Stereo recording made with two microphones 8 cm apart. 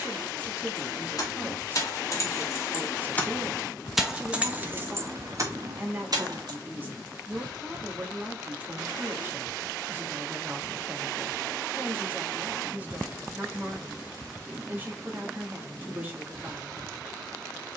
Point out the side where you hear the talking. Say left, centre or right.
right.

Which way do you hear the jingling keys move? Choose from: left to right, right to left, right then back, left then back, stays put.
left to right.